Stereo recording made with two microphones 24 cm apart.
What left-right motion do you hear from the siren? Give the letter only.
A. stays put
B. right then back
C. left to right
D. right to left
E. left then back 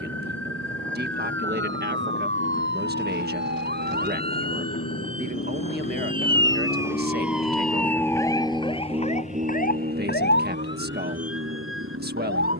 D.